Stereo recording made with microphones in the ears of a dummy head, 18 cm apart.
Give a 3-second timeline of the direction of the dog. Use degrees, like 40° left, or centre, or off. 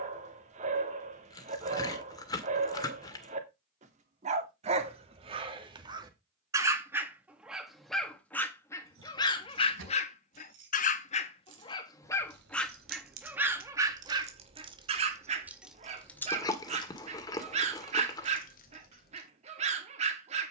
30° right, 30° right, centre, 30° left, 10° right, 30° right, 30° right.